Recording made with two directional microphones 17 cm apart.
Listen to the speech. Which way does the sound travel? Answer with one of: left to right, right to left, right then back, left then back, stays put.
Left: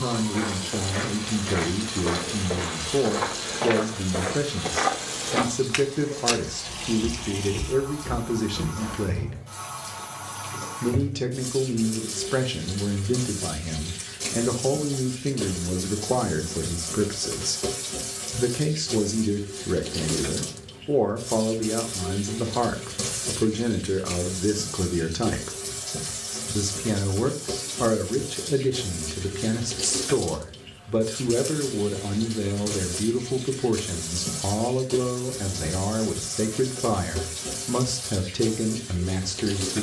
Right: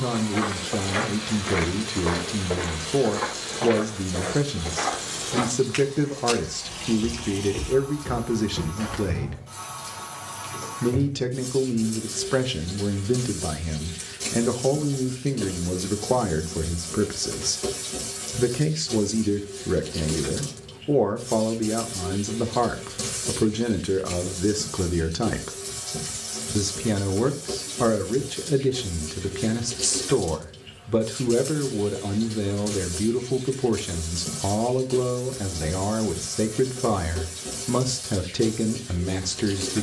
stays put.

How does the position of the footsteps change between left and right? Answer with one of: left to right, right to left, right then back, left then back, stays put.
left then back.